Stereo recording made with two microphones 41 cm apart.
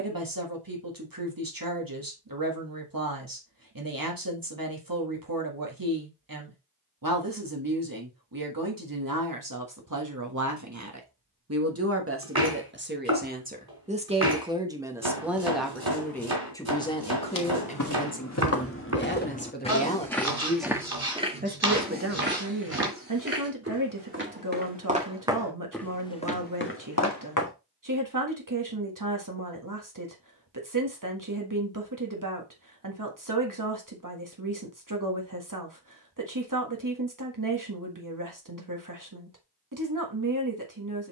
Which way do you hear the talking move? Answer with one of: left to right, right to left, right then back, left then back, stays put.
left then back.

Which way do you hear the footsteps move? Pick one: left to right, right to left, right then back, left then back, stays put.
right then back.